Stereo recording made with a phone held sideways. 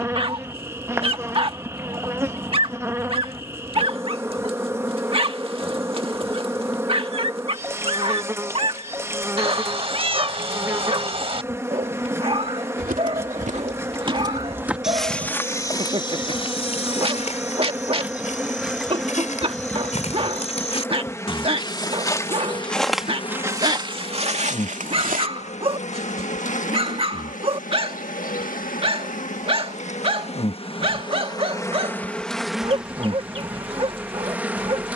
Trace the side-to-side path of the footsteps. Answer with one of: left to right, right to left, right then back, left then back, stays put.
left then back.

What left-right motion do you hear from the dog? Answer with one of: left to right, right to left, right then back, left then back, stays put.
stays put.